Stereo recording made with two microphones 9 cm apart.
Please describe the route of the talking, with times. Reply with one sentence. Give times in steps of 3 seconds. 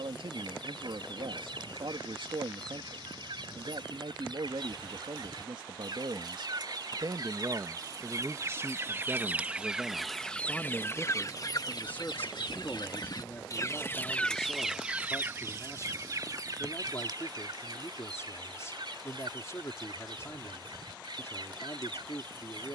You can hear the talking on the right from 0 s, in the centre from 9 s and on the left from 12 s.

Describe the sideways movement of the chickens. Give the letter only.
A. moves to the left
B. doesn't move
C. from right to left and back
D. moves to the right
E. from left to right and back
C.